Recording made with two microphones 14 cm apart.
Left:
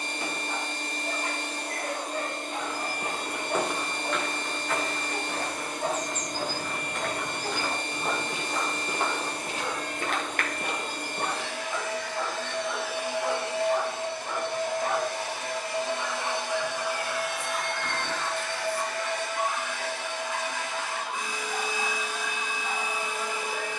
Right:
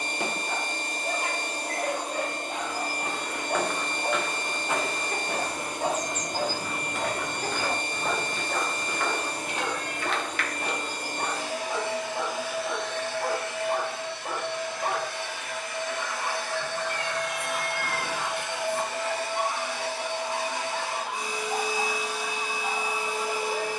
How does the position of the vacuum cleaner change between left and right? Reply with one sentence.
In this clip you hear the vacuum cleaner go left and come back.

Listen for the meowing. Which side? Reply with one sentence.
You can hear the meowing on the right.